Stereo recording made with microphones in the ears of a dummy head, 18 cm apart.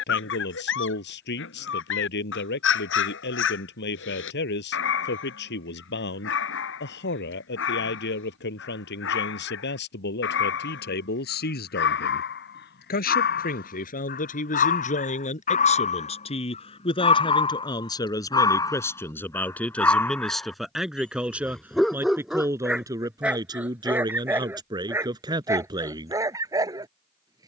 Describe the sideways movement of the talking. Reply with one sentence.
In this clip you hear the talking move from left to right.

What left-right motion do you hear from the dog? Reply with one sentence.
In this clip you hear the dog go from the left side to the right.